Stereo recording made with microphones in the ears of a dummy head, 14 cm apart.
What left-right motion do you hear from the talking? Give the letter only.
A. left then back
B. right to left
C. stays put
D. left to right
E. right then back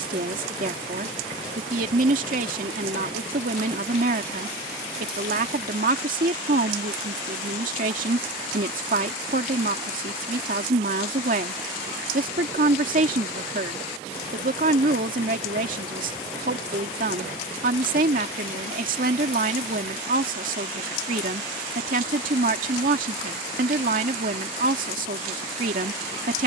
C.